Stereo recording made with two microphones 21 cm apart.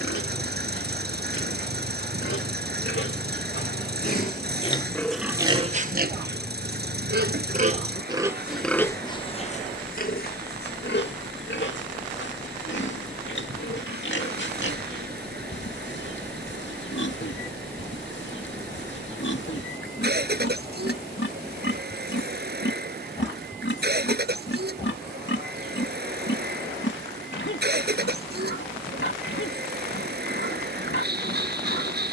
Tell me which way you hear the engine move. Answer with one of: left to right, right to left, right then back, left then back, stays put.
stays put.